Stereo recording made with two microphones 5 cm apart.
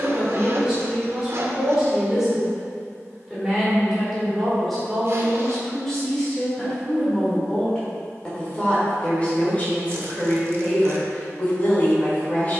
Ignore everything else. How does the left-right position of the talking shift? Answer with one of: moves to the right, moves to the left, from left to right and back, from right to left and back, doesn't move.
moves to the left.